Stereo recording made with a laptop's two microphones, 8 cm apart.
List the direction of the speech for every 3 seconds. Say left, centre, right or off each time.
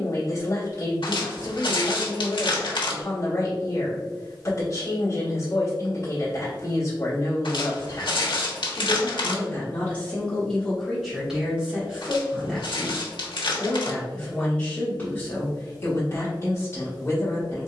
left, left, left, centre, centre, left.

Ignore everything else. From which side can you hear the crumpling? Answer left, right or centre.
left.